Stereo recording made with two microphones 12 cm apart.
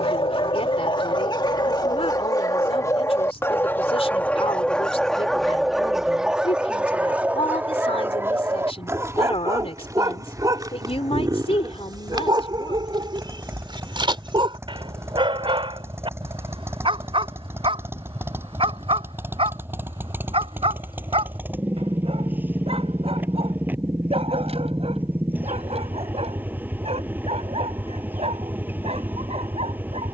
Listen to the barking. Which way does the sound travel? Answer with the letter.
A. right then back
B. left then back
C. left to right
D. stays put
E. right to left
C.